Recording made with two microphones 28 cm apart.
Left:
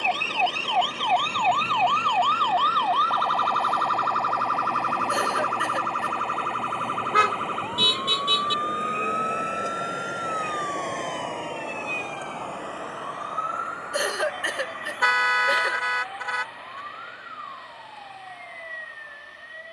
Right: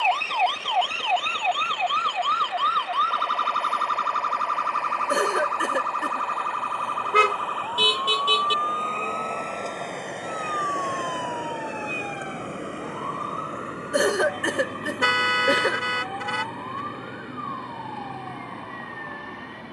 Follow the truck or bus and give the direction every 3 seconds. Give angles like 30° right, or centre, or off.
50° left, 40° left, 30° left, centre, 30° right, 50° right, 70° right.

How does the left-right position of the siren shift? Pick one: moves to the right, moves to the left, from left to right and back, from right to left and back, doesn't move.
moves to the right.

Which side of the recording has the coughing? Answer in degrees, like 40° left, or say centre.
60° right.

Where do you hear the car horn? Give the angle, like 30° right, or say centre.
30° right.